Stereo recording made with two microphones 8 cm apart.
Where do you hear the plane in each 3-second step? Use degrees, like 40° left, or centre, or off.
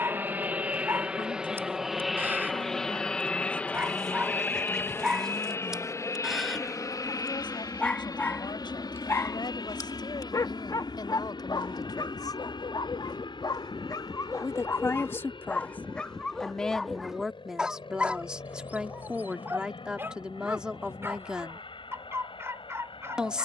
10° right, 20° left, 40° left, 60° left, 60° left, 70° left, 70° left, 70° left.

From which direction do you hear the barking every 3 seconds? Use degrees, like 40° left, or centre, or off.
30° right, 20° right, 10° left, 50° left, 50° left, 10° left, 20° right, 30° right.